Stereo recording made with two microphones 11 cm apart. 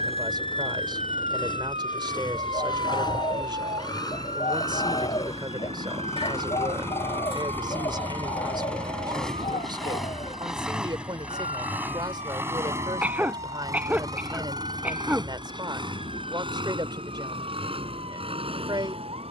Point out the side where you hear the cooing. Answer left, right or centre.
left.